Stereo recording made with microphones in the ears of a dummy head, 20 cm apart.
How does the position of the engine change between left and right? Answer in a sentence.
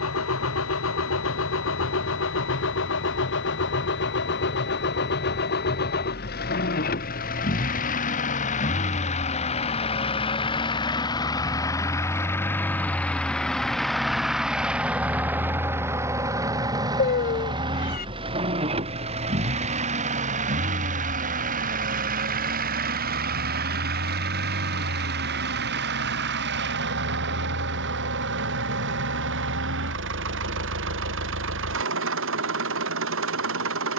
You can hear the engine move from left to right.